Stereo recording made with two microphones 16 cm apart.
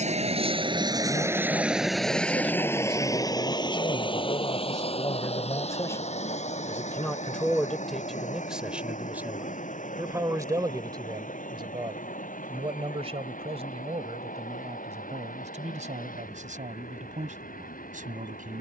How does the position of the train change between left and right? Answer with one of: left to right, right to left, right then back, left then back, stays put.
right to left.